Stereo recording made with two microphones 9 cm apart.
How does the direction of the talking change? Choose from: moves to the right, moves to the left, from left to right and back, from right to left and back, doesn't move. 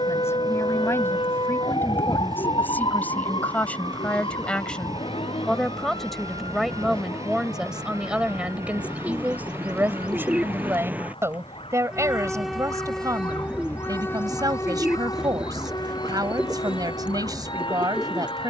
moves to the right.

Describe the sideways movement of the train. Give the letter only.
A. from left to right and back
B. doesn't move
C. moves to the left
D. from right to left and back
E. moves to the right
C.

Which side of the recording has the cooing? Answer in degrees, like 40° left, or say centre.
10° right.